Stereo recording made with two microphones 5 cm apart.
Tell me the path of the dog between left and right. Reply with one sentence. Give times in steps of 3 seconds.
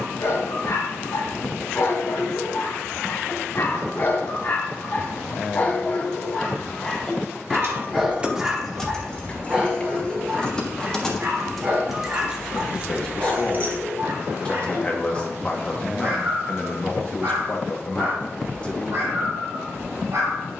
You can hear the dog on the left from 0 s, in the centre from 6 s and on the right from 9 s.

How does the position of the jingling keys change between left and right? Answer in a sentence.
In this clip you hear the jingling keys move from right to left and back again.